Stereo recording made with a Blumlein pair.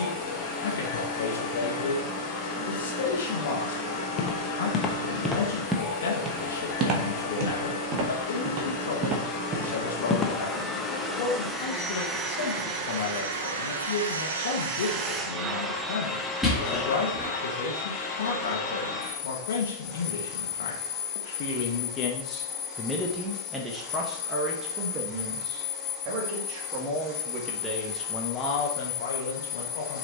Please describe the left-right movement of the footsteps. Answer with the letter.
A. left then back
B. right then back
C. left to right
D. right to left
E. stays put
B.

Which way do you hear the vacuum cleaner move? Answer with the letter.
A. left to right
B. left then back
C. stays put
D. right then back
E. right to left
D.